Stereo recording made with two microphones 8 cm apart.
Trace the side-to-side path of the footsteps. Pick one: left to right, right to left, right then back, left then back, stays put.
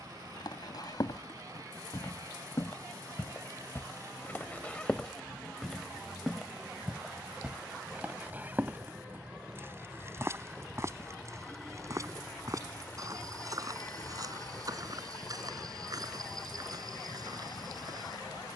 left to right.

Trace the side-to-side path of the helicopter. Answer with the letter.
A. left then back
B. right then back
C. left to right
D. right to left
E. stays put
D.